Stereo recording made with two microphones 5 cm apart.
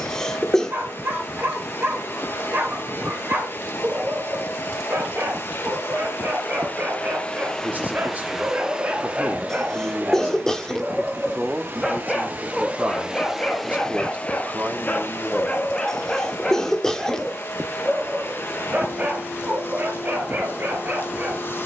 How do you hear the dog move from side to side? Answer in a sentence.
In this clip you hear the dog move from right to left and back again.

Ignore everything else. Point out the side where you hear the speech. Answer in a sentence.
You can hear the speech on the right.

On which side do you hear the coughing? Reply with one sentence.
You can hear the coughing in the centre.